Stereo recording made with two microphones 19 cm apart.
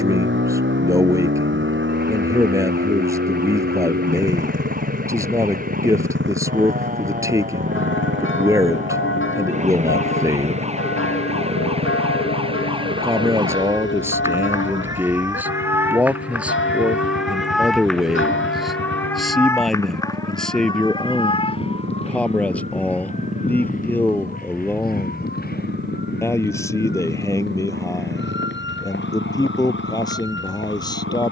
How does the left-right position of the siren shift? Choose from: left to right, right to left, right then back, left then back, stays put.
right to left.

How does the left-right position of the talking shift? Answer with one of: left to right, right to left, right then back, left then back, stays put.
right to left.